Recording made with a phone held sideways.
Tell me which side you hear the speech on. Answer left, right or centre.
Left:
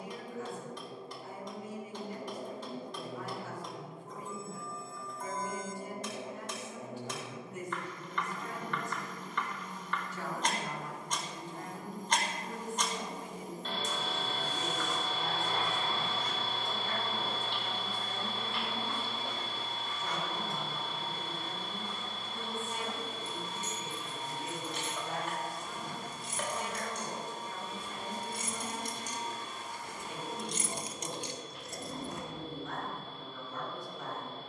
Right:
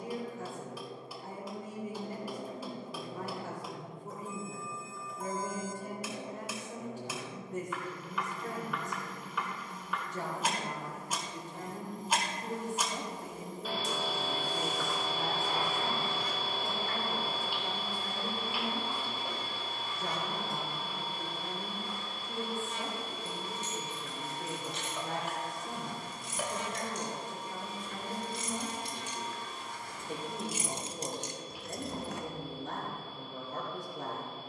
right.